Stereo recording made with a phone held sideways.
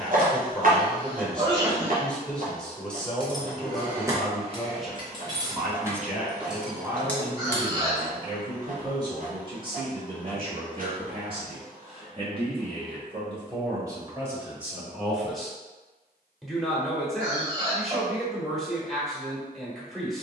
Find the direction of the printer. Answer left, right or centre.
right.